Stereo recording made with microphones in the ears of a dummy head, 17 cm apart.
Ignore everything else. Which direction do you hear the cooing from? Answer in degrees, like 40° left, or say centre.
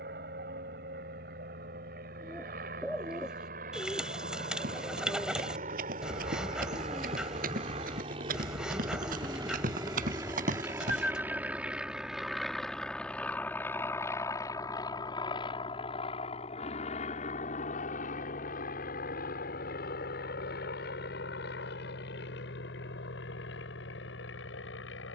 centre.